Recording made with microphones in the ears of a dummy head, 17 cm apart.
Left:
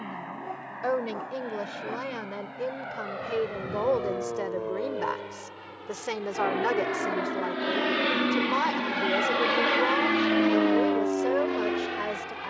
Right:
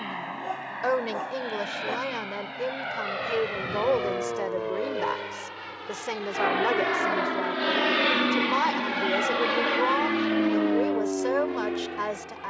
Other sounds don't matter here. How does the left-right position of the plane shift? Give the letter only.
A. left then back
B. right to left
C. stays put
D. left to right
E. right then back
B.